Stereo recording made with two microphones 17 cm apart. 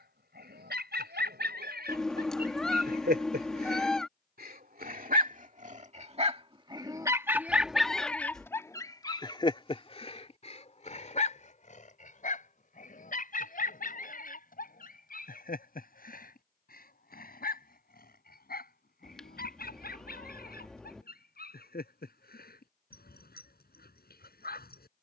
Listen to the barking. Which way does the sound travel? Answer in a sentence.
In this clip you hear the barking travel towards the left.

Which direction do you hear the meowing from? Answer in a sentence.
In this clip you hear the meowing in the centre.